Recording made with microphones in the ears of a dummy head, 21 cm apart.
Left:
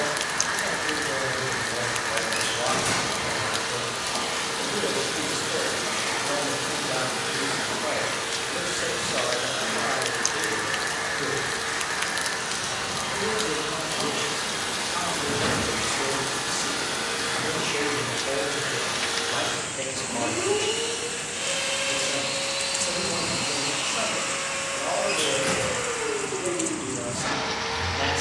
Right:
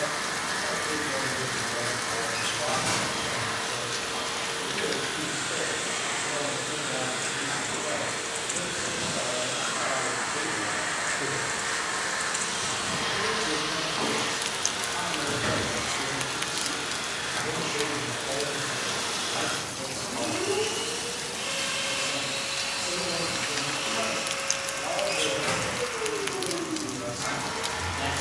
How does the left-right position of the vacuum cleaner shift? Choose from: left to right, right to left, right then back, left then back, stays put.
right then back.